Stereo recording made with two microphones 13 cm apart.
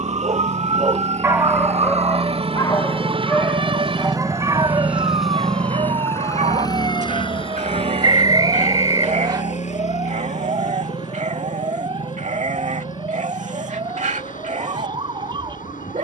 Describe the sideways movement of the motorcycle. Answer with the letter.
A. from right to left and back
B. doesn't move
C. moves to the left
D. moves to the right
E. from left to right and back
C.